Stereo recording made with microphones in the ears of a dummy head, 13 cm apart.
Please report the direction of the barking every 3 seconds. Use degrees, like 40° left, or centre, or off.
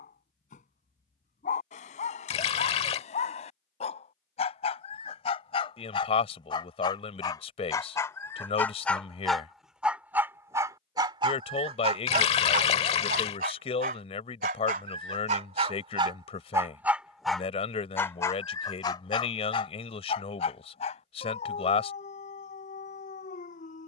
50° left, 50° left, 20° left, 20° right, 60° right, 30° right, 30° left, 50° left.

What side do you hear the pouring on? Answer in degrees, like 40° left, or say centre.
40° left.